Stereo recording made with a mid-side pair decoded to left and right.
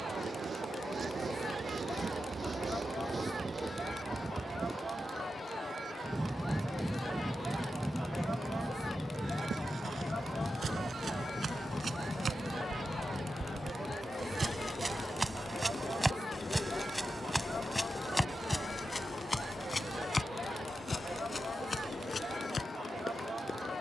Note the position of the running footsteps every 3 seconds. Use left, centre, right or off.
off, off, off, right, right, centre, left, left.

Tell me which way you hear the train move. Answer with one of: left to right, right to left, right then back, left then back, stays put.
right to left.